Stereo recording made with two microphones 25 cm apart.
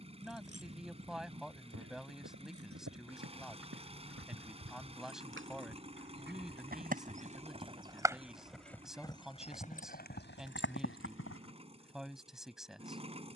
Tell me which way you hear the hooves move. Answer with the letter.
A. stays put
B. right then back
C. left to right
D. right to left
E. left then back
D.